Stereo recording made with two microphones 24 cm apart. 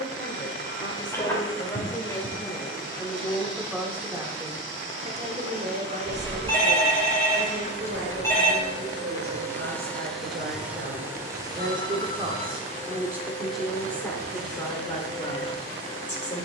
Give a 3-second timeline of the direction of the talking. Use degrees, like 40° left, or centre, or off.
30° left, 20° right, 60° right, 50° right, centre, 30° left.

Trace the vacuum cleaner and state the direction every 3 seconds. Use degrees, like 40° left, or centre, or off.
50° left, 50° left, 30° left, centre, 40° right, 50° right.